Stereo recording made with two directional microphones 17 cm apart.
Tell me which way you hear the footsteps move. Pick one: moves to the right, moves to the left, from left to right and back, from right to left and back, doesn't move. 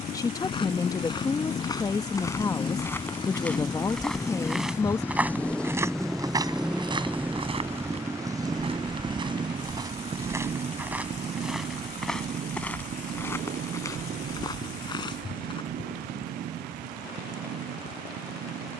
from left to right and back.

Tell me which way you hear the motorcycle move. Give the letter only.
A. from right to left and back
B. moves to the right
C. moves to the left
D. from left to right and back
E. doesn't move
B.